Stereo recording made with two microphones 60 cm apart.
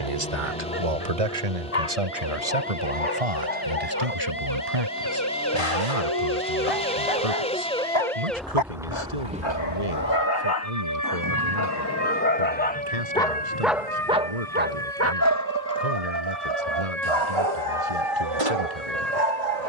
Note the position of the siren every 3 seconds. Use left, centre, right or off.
left, left, centre, right, right, right, right.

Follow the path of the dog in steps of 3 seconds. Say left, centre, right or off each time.
left, left, left, left, centre, right, right.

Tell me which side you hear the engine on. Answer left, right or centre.
centre.